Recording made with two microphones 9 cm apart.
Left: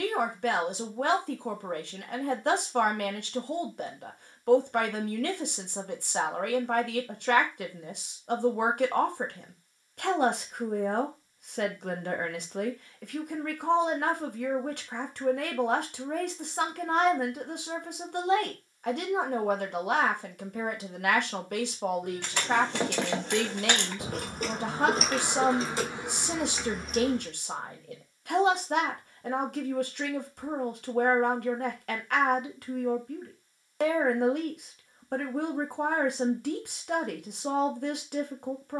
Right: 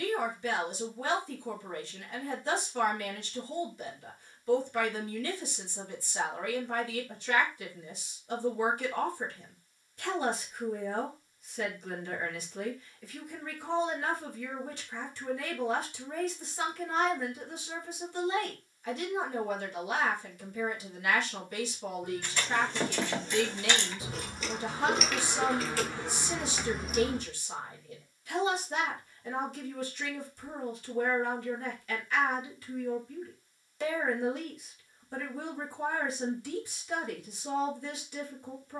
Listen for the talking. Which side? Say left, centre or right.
left.